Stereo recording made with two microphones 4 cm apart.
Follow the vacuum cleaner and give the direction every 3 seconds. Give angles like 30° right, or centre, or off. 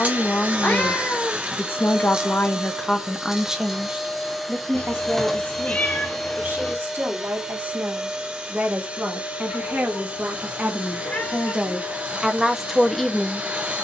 20° right, centre, 10° right, 30° right, 30° right.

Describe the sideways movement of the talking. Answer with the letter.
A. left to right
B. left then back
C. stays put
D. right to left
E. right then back
E.